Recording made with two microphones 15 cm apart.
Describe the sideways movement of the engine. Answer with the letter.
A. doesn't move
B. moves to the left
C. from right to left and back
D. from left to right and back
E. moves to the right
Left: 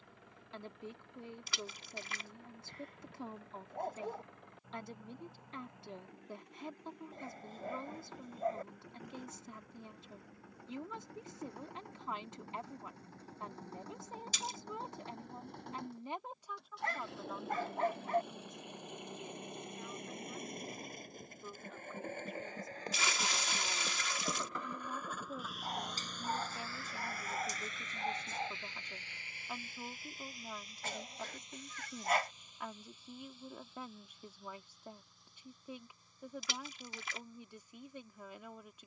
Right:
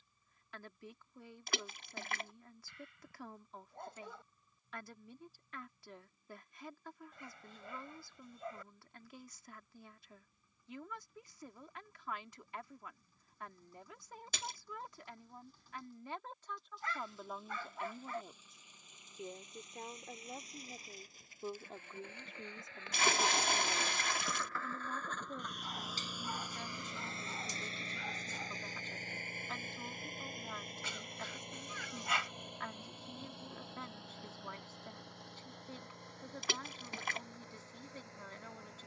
E.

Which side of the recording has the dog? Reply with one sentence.
In this clip you hear the dog on the left.